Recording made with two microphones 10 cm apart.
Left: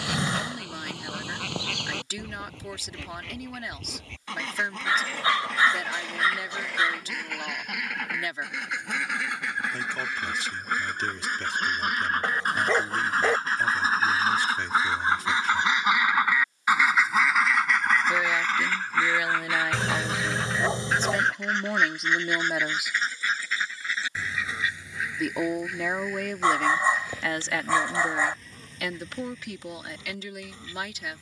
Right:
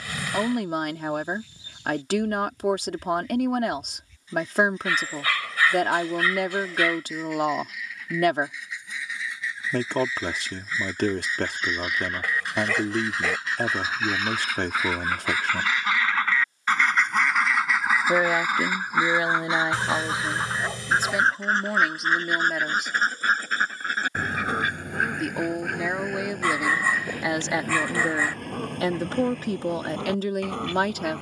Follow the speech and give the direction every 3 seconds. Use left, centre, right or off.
right, right, right, right, right, right, right, centre, centre, right, right.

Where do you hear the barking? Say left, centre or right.
left.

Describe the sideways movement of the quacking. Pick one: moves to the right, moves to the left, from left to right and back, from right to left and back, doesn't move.
moves to the right.